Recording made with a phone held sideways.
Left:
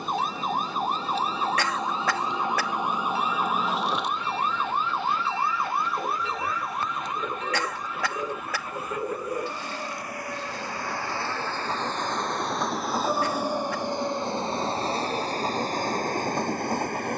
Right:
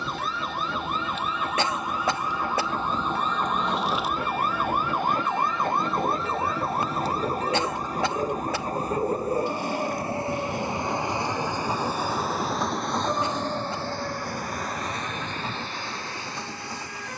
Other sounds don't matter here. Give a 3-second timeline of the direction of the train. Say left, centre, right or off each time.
right, right, right, right, centre, left.